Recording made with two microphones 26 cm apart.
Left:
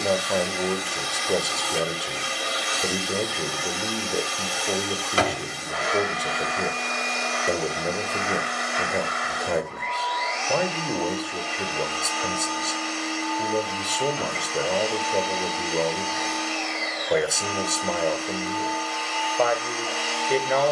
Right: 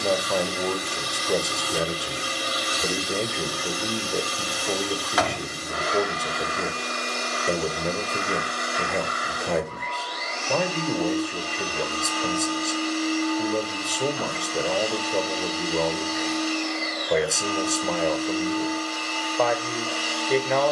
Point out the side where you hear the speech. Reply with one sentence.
In this clip you hear the speech in the centre.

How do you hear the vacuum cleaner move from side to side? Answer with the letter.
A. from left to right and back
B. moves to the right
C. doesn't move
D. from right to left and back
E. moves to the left
C.